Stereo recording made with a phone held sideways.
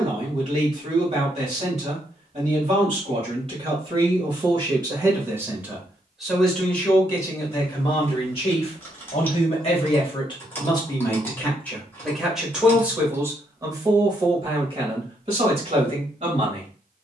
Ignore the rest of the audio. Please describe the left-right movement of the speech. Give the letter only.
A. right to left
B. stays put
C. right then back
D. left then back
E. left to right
D.